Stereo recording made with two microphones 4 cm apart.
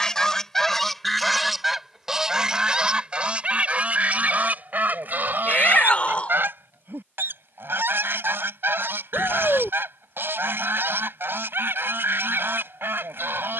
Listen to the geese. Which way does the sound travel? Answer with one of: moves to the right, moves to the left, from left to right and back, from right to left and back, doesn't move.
moves to the right.